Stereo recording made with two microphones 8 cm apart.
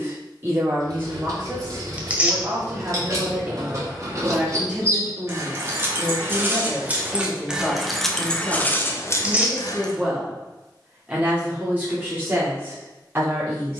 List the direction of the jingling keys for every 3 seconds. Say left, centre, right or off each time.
right, right, centre, left, off.